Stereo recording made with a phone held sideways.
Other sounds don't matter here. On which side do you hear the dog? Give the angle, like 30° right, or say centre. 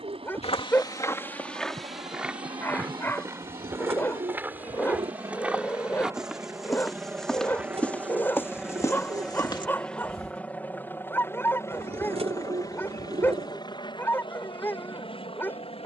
20° left.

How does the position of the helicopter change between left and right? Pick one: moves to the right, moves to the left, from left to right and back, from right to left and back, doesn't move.
moves to the left.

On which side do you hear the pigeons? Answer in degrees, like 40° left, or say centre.
50° right.